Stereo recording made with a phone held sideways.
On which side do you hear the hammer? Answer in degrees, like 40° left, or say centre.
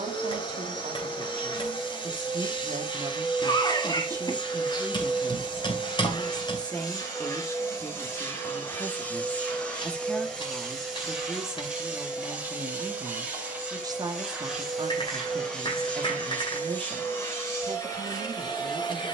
40° left.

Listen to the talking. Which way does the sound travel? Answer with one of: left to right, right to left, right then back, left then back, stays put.
left then back.